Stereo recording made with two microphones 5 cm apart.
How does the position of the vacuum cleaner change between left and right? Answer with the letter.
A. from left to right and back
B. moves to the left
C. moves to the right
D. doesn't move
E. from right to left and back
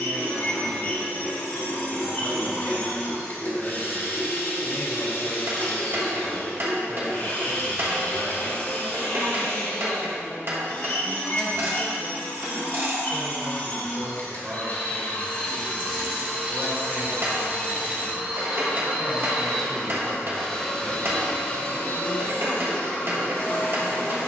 A.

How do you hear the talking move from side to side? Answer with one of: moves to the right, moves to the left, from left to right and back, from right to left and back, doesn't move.
moves to the right.